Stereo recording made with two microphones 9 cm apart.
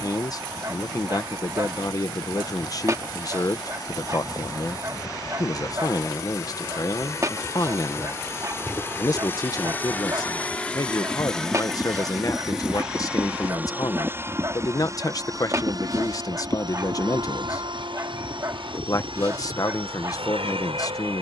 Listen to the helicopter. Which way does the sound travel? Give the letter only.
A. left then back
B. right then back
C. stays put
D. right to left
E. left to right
E.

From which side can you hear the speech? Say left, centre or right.
left.